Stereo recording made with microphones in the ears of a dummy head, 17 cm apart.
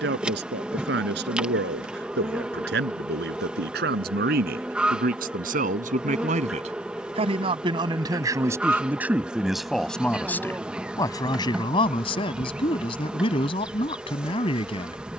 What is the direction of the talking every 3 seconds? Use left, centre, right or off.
right, right, right, centre, left.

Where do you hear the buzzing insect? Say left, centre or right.
centre.